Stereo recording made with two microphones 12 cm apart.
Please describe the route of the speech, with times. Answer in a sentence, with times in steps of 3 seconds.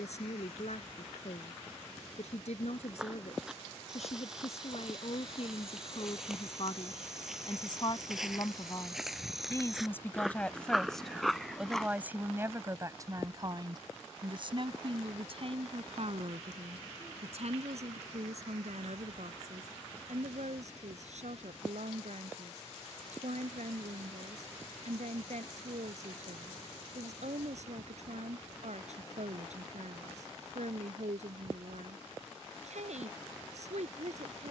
In this clip you hear the speech on the left from 0 s, in the centre from 9 s and on the right from 12 s.